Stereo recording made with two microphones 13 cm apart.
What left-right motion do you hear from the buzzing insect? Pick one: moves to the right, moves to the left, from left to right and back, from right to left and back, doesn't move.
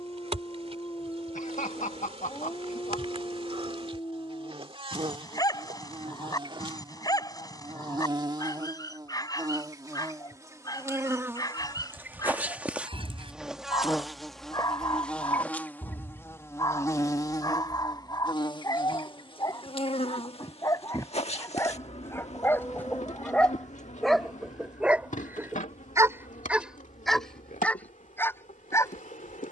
moves to the left.